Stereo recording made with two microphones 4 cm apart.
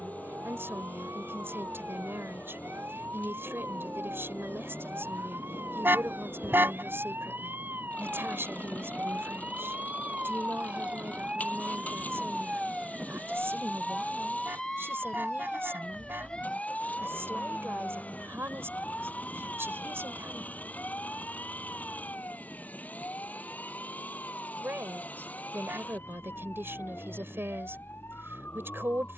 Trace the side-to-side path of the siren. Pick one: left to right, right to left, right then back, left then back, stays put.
right to left.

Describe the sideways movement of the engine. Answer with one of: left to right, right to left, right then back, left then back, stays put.
stays put.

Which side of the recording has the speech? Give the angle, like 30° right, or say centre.
70° right.